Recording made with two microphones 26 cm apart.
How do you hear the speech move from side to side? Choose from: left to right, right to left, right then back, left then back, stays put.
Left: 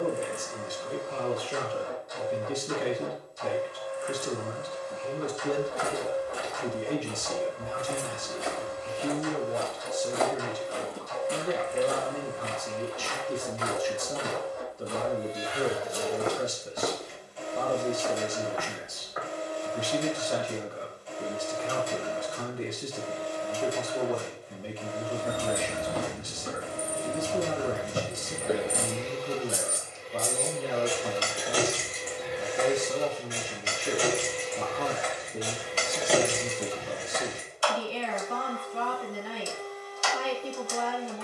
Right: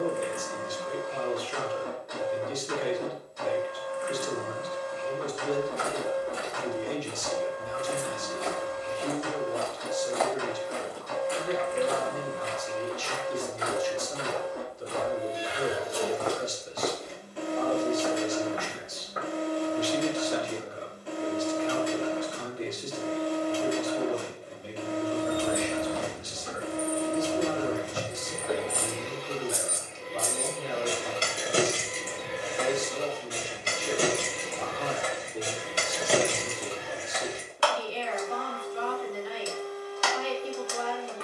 stays put.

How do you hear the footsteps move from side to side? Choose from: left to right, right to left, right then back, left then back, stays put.
left then back.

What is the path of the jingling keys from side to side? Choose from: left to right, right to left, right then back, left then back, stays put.
right then back.